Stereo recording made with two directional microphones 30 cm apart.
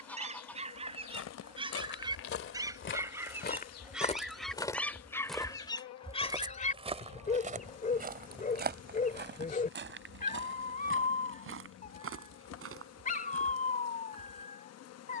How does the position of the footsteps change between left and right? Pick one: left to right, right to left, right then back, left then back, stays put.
left to right.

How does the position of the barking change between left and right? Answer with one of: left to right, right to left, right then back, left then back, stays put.
right to left.